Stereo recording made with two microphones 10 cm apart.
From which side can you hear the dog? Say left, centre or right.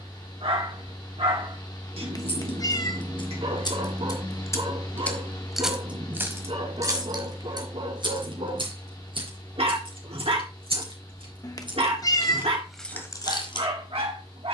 right.